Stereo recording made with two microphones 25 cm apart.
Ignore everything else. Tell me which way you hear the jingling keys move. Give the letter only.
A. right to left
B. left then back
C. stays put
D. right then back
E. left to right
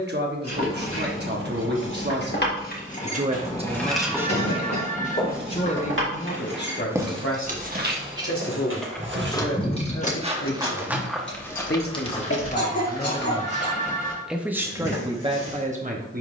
D.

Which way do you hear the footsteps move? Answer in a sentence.
You can hear the footsteps go right and come back.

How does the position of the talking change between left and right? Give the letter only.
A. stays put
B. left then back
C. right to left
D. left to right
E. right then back
B.